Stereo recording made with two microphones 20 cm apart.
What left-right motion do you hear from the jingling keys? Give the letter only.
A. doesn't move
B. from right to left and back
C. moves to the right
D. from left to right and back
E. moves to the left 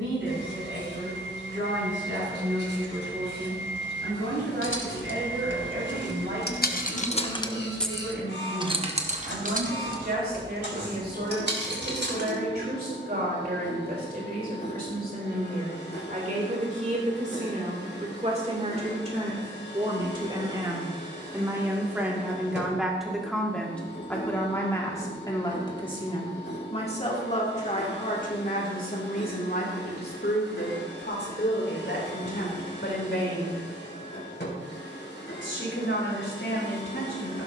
C.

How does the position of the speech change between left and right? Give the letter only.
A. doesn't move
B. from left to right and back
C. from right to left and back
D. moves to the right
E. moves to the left
E.